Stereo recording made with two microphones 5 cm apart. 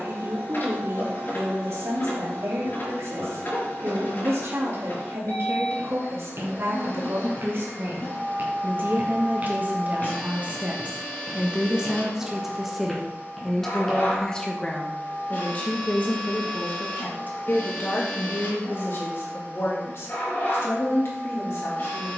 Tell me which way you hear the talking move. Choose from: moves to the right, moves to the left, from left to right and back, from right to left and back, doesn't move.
moves to the left.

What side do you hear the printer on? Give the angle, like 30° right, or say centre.
40° left.